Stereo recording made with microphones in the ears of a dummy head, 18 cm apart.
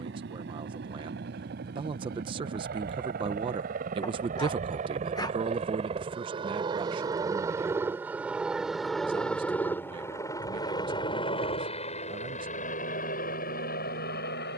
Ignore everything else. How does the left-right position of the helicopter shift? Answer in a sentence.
You can hear the helicopter move from right to left.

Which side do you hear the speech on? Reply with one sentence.
You can hear the speech on the right.